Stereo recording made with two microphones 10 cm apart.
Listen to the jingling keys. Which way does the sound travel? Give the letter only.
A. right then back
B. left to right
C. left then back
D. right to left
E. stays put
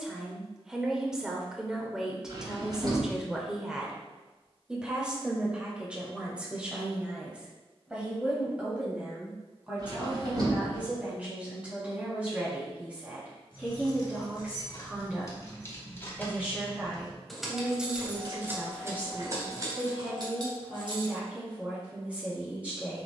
B.